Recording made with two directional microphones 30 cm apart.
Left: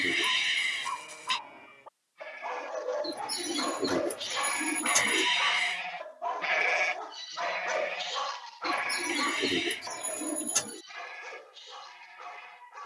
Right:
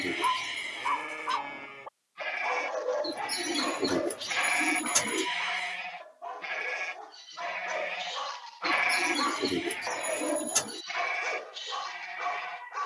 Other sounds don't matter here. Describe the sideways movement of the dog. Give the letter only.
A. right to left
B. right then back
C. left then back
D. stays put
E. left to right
C.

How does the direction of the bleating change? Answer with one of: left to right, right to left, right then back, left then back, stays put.
left then back.